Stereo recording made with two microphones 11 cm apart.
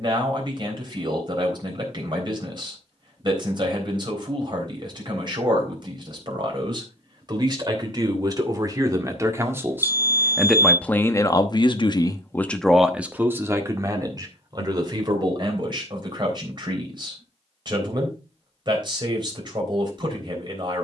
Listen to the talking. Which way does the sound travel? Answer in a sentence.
In this clip you hear the talking go left and come back.